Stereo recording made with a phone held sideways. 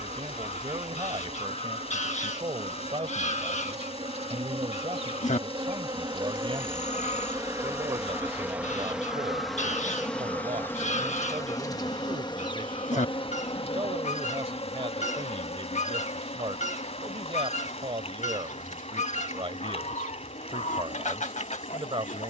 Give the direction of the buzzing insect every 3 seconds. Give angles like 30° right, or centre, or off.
60° right, 50° right, 20° right, 10° left, 40° left, 60° left, 70° left, 70° left.